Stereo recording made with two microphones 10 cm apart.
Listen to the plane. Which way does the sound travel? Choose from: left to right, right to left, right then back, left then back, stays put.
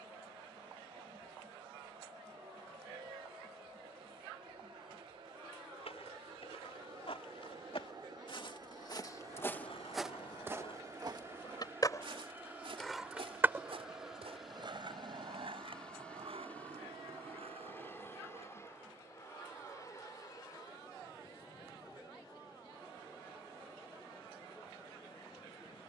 right to left.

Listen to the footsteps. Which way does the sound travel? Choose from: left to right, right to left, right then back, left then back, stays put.
left to right.